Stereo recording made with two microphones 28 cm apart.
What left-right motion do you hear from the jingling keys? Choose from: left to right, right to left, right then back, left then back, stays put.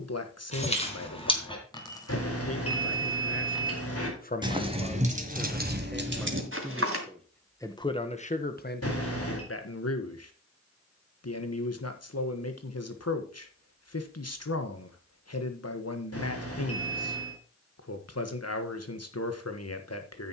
left to right.